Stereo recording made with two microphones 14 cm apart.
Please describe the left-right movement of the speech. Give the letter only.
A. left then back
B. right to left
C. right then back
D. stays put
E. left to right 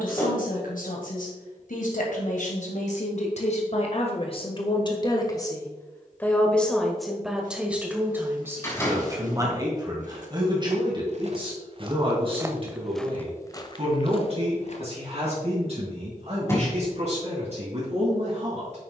E.